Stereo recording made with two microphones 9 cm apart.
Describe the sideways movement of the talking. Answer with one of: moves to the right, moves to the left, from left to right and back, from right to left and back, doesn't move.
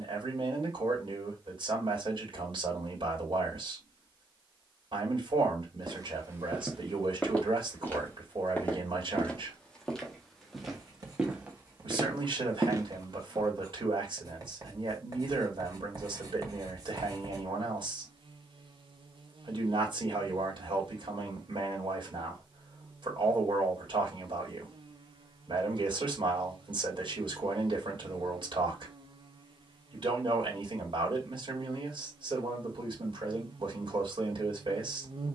doesn't move.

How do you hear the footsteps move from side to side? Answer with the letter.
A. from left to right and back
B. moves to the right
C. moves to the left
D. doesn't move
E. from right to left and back
E.